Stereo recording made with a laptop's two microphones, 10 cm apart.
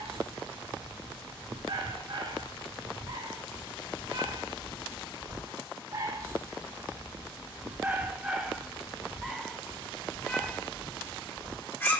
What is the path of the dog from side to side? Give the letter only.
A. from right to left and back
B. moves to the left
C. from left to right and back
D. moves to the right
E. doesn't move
B.